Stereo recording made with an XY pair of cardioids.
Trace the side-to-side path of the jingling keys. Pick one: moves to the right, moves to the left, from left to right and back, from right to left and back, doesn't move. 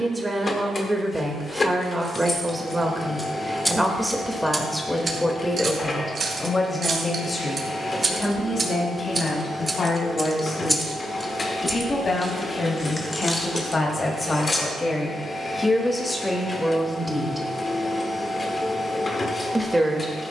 from left to right and back.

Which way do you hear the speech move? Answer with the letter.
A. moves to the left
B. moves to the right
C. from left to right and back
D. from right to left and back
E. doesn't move
D.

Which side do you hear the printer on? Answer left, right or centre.
left.